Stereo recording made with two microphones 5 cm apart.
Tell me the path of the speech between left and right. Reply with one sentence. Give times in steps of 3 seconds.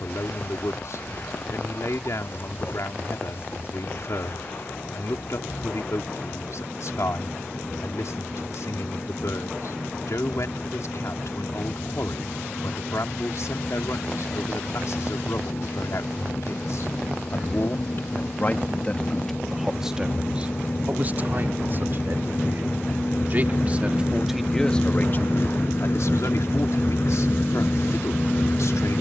In this clip you hear the speech on the left from 0 s, in the centre from 18 s, on the right from 21 s and on the left from 24 s.